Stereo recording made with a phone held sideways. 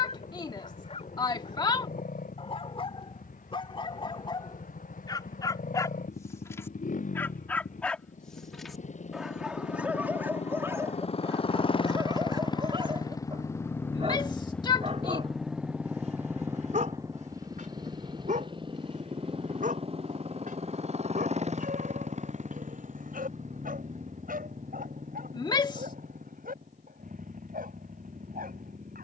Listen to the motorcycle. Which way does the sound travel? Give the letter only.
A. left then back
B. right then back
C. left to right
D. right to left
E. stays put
C.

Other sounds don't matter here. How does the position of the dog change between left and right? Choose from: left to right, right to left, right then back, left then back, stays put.
left to right.